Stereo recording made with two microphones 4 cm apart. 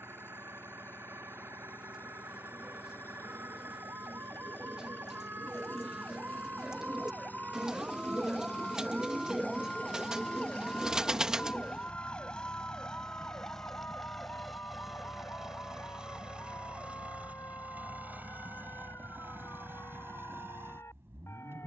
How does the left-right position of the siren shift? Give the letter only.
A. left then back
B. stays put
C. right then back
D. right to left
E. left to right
D.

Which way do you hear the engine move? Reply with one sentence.
In this clip you hear the engine move to the right.